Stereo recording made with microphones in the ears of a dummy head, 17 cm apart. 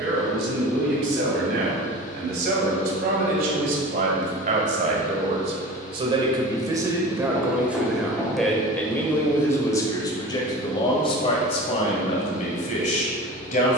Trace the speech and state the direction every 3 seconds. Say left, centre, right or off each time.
right, right, centre, left, left.